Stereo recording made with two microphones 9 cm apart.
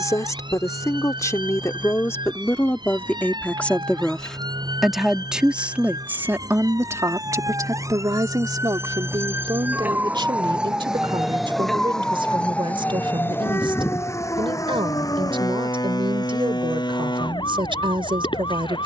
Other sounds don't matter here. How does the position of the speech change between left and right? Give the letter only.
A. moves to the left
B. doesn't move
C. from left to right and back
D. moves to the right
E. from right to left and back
D.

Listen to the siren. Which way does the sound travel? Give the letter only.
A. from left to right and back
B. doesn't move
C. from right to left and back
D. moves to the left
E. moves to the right
D.